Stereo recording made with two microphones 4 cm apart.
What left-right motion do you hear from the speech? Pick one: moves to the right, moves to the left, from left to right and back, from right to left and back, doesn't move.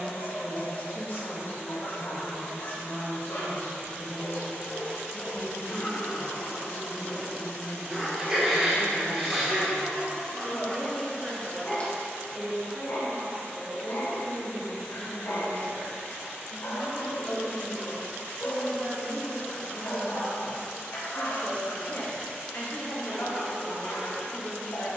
from left to right and back.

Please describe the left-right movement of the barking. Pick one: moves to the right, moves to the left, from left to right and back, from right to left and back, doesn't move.
from left to right and back.